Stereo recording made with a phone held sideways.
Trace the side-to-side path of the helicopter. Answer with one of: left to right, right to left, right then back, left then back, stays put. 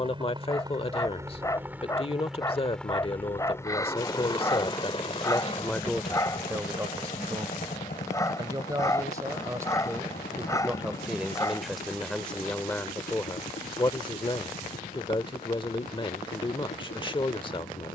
right to left.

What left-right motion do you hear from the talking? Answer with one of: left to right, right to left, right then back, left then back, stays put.
right then back.